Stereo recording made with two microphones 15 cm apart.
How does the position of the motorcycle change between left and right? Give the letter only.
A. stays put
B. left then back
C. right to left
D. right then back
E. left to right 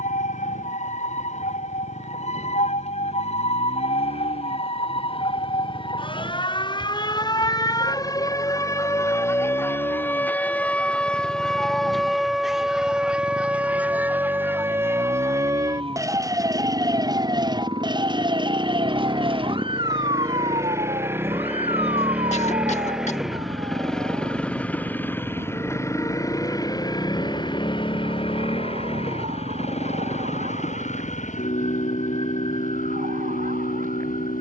C.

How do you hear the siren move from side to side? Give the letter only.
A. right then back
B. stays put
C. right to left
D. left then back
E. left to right
E.